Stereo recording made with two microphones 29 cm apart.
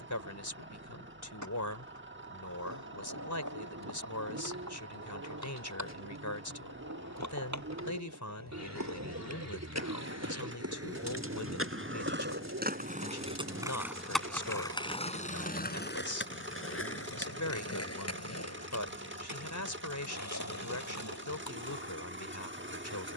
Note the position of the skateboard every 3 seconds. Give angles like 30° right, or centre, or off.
80° right, 80° right, 70° right, 60° right, 10° right, 40° left, 60° left, 70° left.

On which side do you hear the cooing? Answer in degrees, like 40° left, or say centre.
60° right.